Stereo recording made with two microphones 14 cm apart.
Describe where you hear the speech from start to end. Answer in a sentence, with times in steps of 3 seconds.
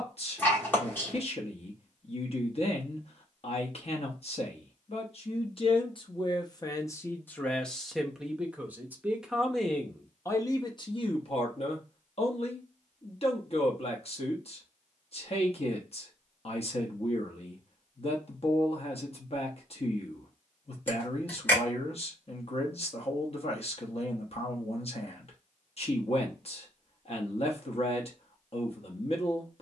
In this clip you hear the speech on the left from 0 s, in the centre from 6 s and on the left from 9 s.